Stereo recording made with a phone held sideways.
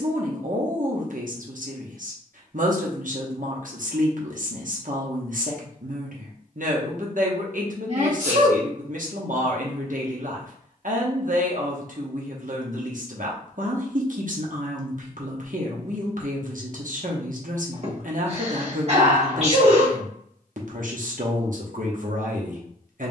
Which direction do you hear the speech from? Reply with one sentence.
In this clip you hear the speech on the right.